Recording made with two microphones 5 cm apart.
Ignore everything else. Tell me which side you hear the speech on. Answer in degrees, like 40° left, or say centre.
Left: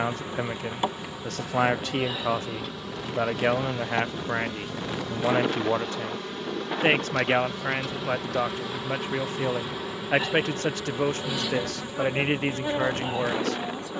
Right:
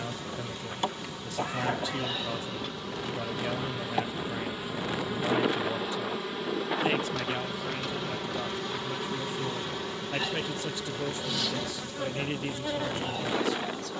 60° left.